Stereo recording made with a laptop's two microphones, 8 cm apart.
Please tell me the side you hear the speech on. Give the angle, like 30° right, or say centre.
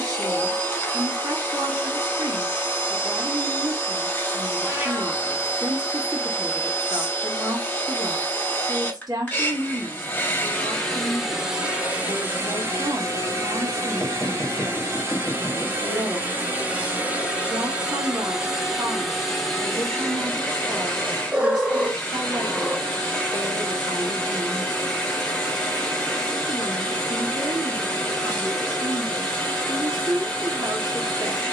60° right.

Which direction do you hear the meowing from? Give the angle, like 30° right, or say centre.
20° right.